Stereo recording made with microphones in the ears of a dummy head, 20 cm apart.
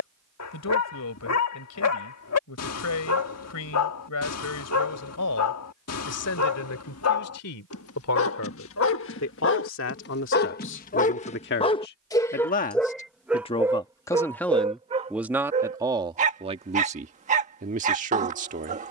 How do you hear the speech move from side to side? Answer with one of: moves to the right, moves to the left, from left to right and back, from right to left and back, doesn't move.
moves to the right.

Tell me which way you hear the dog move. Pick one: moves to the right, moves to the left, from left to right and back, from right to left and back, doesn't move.
moves to the right.